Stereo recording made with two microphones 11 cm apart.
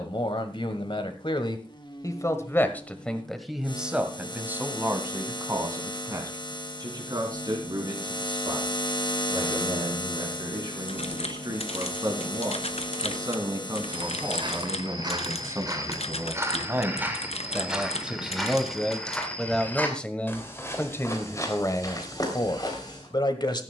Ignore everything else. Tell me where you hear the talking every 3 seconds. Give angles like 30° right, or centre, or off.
40° left, 20° right, 40° right, 40° right, 30° right, 20° right, centre, 40° left.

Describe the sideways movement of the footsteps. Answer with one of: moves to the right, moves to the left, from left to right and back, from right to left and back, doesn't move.
moves to the left.